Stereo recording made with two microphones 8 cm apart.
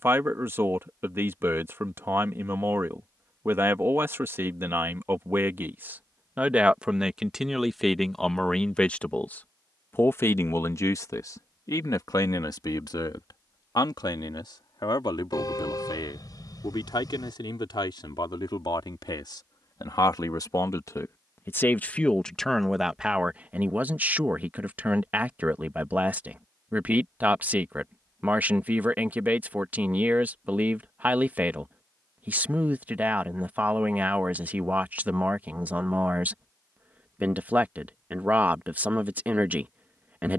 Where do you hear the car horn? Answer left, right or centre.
left.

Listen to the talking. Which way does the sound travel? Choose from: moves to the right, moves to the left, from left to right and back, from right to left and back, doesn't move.
from right to left and back.